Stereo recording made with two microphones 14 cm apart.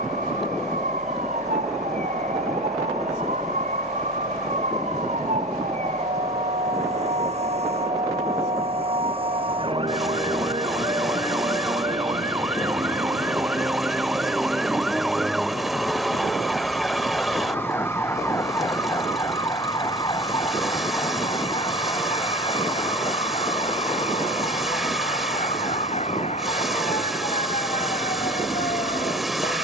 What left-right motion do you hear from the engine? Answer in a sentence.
In this clip you hear the engine stay put.